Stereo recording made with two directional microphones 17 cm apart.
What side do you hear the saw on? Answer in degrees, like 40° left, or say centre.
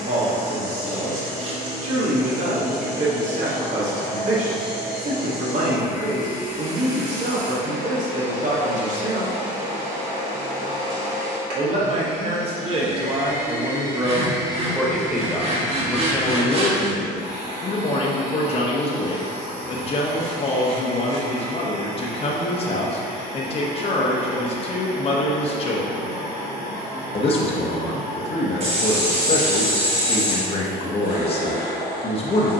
40° right.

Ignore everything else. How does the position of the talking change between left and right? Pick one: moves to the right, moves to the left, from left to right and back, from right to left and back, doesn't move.
moves to the left.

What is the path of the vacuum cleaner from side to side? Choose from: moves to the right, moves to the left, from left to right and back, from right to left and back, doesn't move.
doesn't move.